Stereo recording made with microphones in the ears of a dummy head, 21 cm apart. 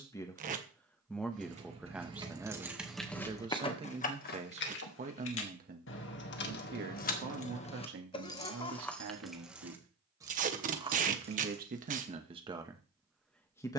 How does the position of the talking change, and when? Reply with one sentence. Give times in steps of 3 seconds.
In this clip you hear the talking in the centre from 0 s, on the right from 3 s and in the centre from 12 s.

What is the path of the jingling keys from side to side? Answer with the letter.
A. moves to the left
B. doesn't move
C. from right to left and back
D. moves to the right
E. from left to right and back
C.